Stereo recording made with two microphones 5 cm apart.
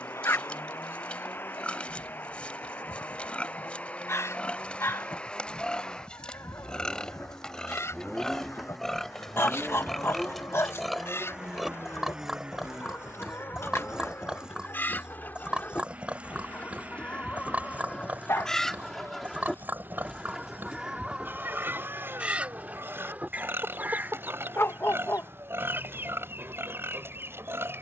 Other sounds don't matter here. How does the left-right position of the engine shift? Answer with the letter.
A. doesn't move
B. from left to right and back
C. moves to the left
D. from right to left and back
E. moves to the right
E.